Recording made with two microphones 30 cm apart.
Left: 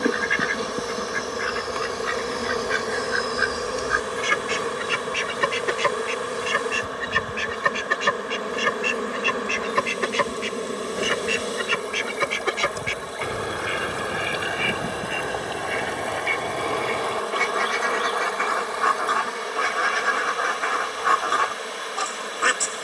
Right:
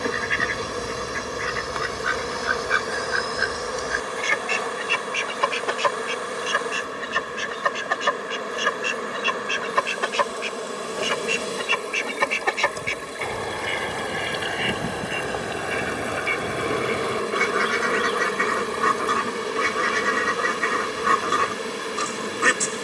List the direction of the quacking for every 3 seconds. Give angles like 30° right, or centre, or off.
30° right, 20° left, 30° left, 30° left, 10° left, 10° right, 30° right, 30° right.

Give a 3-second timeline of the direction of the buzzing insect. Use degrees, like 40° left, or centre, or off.
40° left, 40° left, 40° left, 30° left, 10° left, 20° right, 50° right, 50° right.